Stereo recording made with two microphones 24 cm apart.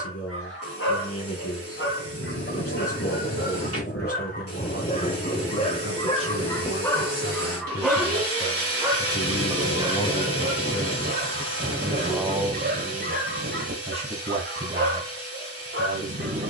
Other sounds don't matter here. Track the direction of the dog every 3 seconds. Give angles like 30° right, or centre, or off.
60° left, 40° left, 10° left, 30° right, 50° right, 50° right.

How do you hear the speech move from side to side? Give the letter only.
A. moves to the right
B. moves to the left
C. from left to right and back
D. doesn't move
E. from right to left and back
A.